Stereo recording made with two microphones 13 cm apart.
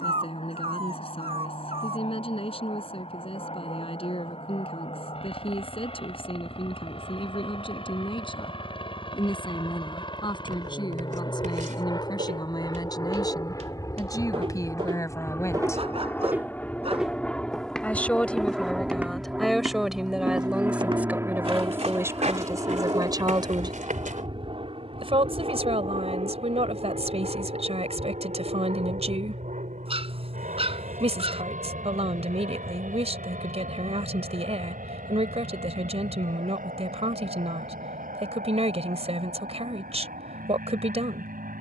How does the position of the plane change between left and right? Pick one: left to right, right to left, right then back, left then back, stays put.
left to right.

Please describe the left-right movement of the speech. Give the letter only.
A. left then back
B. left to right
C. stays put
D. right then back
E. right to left
B.